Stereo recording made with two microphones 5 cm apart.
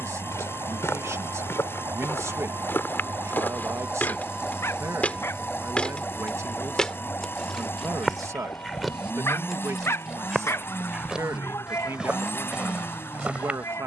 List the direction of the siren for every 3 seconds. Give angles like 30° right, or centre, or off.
60° right, 10° right, 30° left, 50° left, 60° left.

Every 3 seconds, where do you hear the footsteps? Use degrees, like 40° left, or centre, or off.
50° left, 30° left, centre, 10° right, 20° right.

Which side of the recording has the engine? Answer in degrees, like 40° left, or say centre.
50° left.